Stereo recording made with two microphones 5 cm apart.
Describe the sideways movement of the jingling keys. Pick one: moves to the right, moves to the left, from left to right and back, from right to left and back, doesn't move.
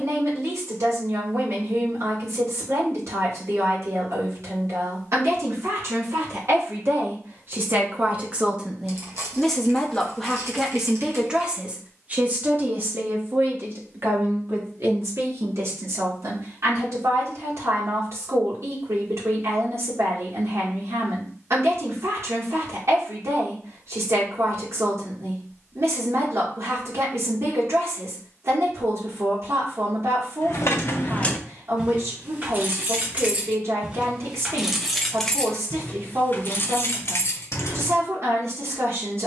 from left to right and back.